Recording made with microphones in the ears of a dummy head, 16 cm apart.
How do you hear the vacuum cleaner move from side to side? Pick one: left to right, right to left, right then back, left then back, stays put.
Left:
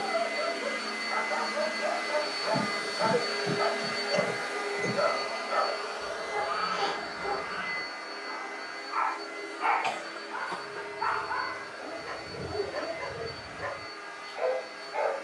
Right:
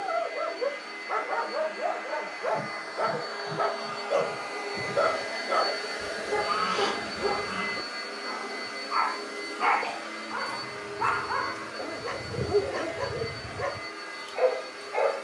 left to right.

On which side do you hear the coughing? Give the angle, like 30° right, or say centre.
60° left.